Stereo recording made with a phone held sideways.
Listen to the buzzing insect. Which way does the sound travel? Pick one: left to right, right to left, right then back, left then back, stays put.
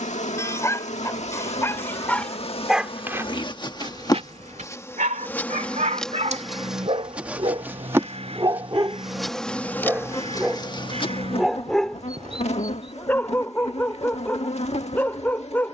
right then back.